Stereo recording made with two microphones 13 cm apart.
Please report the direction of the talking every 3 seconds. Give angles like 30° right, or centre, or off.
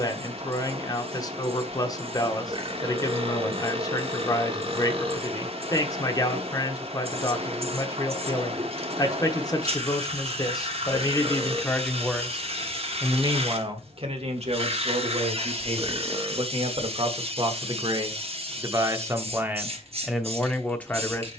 30° left, 30° left, 30° left, 30° left, 40° right, 50° right, 10° right.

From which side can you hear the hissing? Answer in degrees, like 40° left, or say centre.
50° right.